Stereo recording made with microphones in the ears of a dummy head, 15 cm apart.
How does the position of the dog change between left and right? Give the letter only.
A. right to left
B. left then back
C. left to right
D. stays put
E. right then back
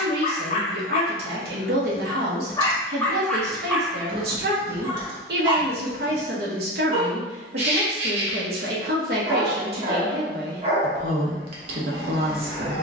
C.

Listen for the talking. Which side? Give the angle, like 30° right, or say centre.
60° right.